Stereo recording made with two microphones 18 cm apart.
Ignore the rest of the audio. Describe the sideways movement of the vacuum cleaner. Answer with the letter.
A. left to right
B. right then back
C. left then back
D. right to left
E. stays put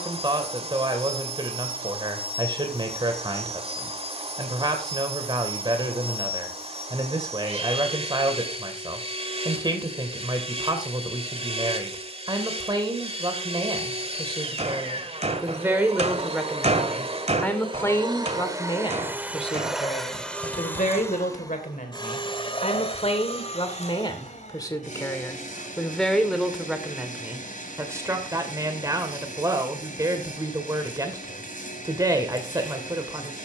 D.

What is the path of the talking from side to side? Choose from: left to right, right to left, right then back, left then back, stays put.
left then back.